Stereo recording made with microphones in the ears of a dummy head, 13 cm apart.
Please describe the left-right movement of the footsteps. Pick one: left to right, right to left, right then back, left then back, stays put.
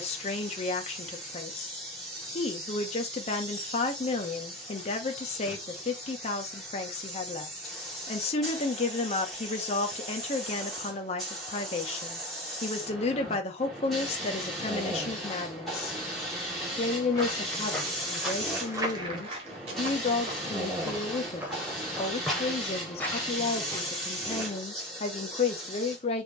right then back.